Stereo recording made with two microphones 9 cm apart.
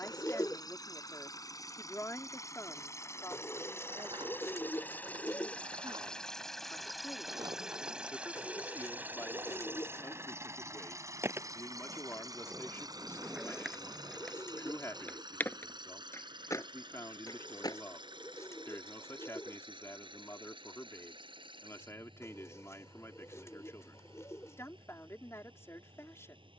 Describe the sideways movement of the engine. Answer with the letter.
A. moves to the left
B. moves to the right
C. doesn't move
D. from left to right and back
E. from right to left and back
B.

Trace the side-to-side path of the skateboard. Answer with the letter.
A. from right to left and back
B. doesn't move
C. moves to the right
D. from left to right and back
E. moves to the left
E.